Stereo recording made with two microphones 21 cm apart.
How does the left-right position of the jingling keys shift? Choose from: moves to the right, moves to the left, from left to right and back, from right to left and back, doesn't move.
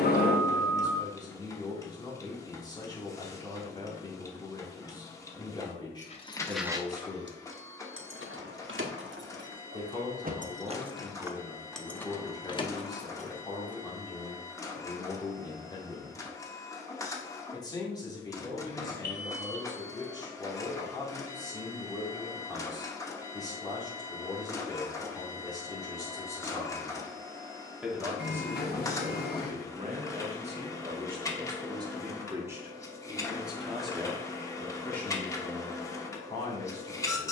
from left to right and back.